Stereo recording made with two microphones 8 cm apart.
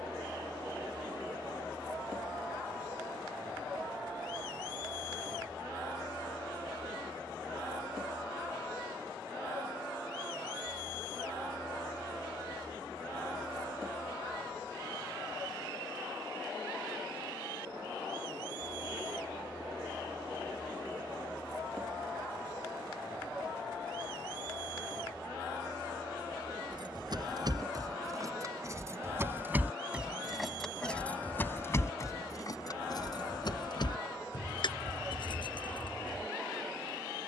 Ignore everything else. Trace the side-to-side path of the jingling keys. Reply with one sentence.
You can hear the jingling keys move to the left.